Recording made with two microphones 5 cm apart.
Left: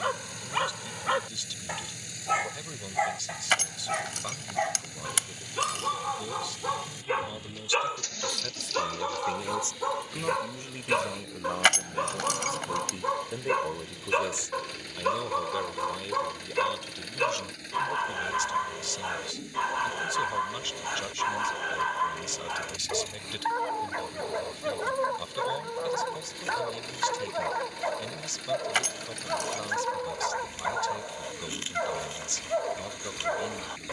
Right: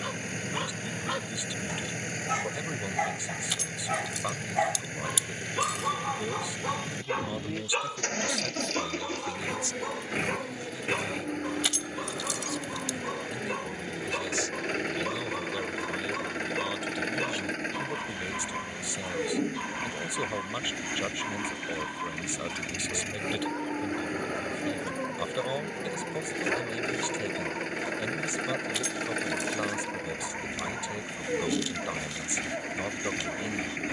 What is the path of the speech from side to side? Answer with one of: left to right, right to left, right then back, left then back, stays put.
left then back.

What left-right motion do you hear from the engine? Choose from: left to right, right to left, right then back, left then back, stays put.
stays put.